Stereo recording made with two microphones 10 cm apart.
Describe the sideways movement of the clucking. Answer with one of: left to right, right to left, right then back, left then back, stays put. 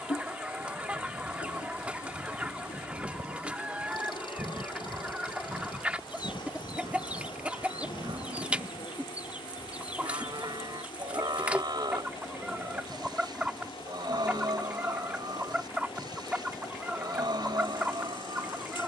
stays put.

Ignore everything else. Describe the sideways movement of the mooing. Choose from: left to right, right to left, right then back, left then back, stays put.
stays put.